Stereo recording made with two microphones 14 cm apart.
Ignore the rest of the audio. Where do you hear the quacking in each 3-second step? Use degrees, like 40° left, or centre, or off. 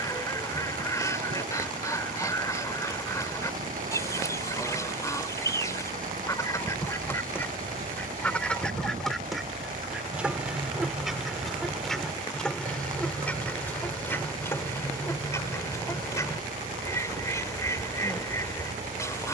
20° left, 20° left, 10° left, centre, 10° left, 20° left, 20° left.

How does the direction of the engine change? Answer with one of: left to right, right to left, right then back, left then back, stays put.
stays put.